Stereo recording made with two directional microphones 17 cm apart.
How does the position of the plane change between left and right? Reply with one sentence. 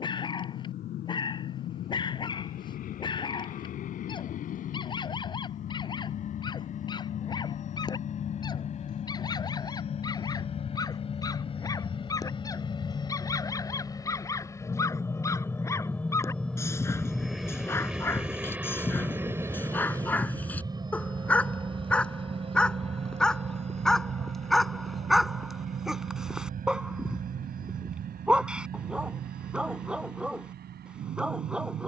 In this clip you hear the plane move to the right.